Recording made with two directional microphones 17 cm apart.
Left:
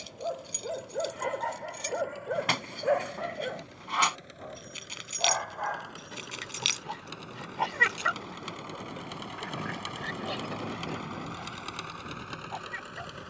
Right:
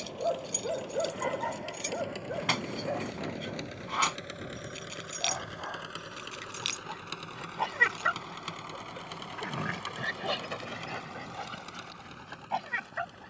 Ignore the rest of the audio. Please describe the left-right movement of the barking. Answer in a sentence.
In this clip you hear the barking go left and come back.